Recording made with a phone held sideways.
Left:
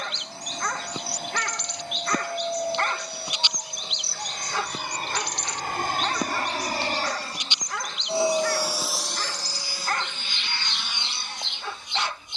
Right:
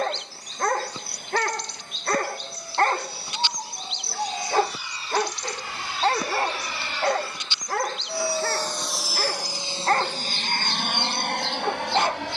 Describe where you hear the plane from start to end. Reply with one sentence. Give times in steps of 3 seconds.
In this clip you hear the plane on the left from 0 s and on the right from 9 s.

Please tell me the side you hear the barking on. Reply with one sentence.
You can hear the barking on the right.